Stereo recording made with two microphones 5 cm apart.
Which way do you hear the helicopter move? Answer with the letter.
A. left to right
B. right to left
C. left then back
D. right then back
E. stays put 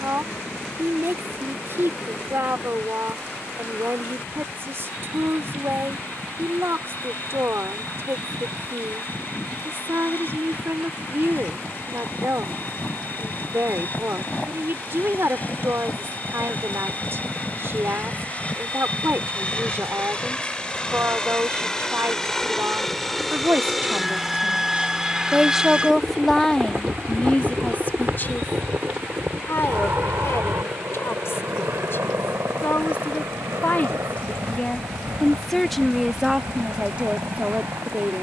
A.